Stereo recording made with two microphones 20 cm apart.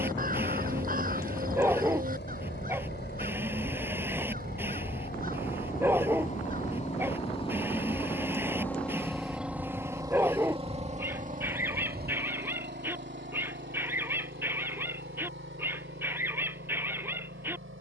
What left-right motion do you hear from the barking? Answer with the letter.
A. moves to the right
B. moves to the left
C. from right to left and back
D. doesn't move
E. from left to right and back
D.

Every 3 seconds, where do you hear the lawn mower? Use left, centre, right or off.
left, left, left, right, right, right.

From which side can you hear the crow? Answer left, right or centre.
right.